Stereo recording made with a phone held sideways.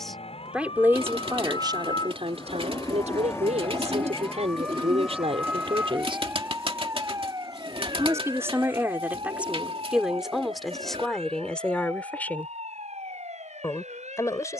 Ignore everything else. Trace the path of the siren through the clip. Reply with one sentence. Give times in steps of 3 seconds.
In this clip you hear the siren on the left from 0 s, in the centre from 3 s and on the right from 6 s.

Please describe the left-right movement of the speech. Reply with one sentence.
You can hear the speech move from left to right and back again.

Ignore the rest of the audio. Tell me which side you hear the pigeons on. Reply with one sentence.
You can hear the pigeons on the right.